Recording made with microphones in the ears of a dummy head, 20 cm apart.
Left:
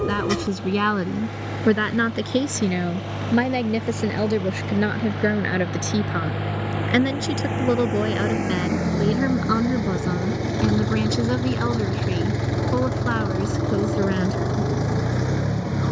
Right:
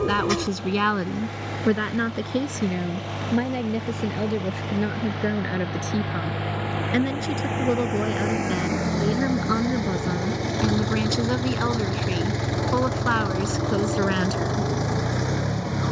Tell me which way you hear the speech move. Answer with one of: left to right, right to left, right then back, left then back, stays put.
left then back.